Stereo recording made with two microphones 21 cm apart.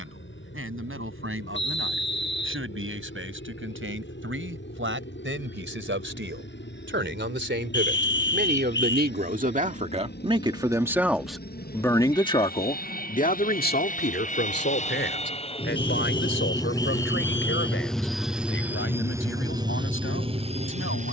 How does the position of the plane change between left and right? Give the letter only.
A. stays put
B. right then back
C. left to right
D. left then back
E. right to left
C.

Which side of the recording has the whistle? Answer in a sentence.
In this clip you hear the whistle on the left.